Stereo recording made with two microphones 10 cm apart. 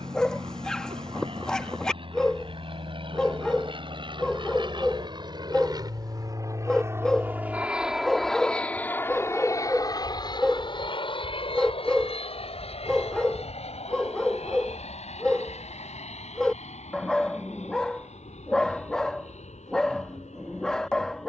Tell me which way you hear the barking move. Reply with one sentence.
You can hear the barking stay in one place.